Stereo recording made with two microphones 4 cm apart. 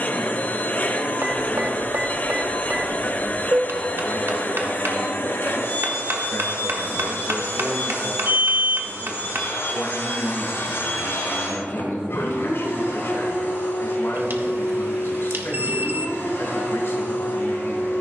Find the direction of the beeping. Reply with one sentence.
You can hear the beeping on the right.